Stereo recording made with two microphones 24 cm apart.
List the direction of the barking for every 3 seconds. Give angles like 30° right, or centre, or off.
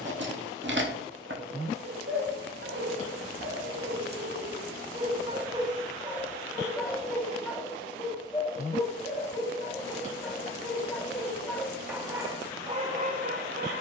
50° right, 30° right, centre, 10° left, 30° right.